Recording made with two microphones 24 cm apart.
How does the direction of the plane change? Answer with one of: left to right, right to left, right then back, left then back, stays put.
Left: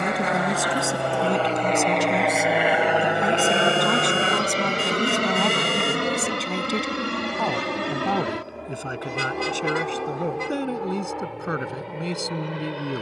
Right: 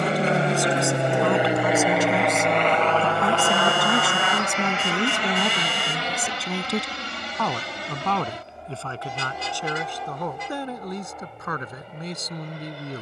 right to left.